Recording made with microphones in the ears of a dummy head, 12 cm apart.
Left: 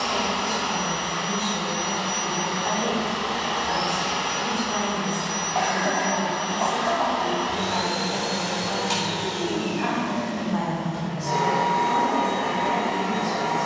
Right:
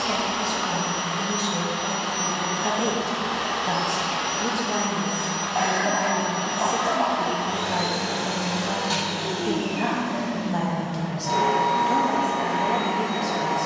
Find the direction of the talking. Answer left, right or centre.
right.